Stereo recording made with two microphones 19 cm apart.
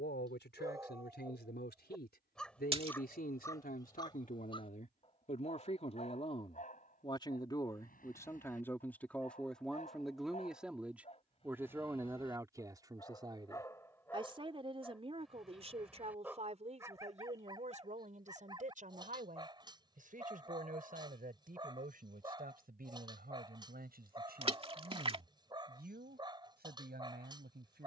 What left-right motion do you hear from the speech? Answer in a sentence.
In this clip you hear the speech move to the right.